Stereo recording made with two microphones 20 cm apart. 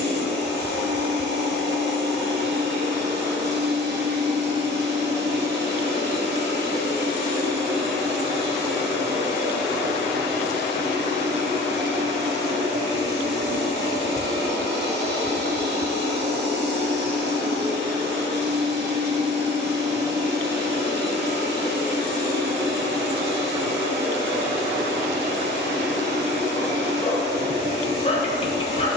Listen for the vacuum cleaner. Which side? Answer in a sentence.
You can hear the vacuum cleaner on the right.